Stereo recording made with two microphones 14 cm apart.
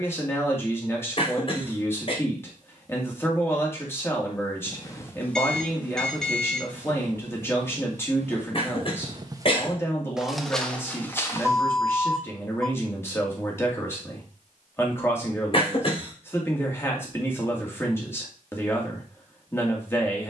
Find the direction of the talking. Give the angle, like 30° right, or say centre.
20° left.